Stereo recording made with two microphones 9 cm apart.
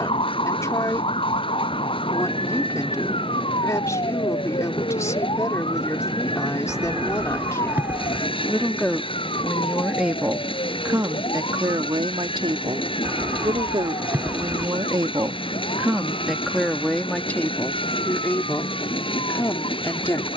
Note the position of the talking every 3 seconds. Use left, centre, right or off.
left, left, left, right, right, centre, left.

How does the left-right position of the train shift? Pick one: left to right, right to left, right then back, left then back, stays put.
stays put.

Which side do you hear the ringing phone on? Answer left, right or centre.
right.